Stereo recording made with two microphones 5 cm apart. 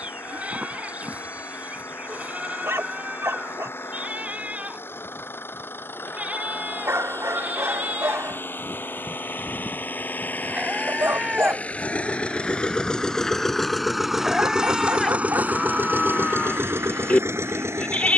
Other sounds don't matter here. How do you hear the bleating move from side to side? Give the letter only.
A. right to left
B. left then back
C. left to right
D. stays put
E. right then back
A.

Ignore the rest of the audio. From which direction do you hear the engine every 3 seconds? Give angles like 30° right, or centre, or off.
60° left, 60° left, 50° left, 40° left, 10° left, 50° right.